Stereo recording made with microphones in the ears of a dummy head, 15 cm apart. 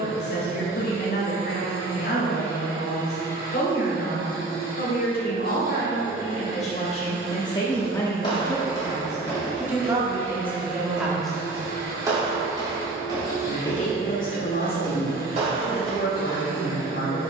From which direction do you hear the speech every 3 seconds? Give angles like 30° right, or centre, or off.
70° left, 60° left, 30° left, 10° right, 50° left, 60° left.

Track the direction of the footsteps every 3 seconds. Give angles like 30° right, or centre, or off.
off, off, 30° left, centre, 30° right, 40° right.